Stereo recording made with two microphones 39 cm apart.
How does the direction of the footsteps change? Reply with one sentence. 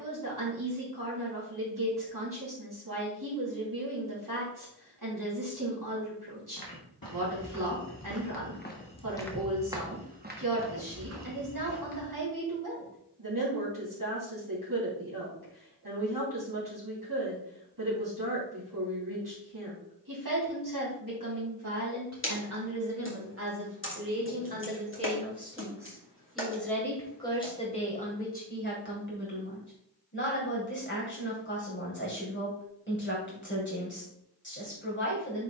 You can hear the footsteps move from left to right.